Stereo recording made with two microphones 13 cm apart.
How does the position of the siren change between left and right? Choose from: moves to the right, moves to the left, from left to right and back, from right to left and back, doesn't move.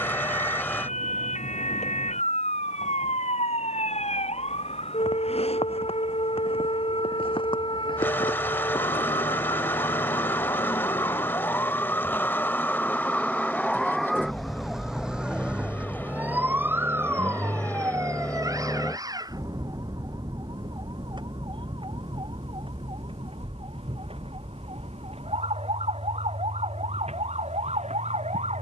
moves to the right.